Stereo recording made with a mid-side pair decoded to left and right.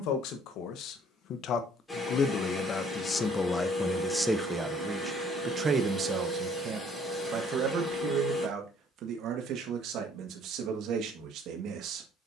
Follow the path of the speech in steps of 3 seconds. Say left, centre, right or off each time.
left, centre, right, right.